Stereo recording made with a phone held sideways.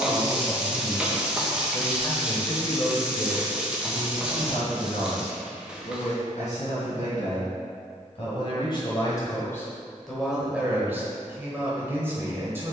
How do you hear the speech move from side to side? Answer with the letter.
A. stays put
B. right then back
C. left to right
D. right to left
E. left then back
E.